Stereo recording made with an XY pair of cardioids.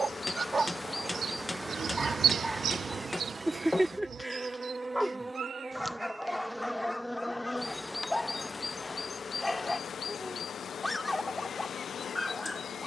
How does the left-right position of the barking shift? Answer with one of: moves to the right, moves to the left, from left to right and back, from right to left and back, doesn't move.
moves to the left.